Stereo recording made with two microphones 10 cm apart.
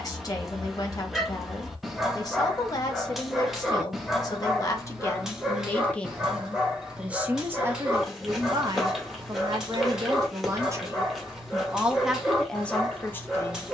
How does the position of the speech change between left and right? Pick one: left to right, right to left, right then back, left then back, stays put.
right then back.